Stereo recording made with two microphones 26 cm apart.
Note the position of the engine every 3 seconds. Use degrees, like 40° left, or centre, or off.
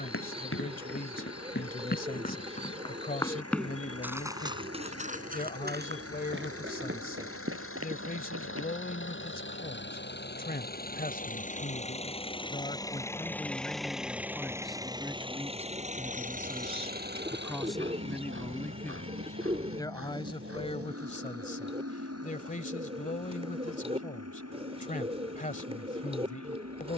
70° left, 70° left, 60° left, 40° left, centre, 30° right, 50° right, 60° right, 70° right.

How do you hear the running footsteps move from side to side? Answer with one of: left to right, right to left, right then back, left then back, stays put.
left to right.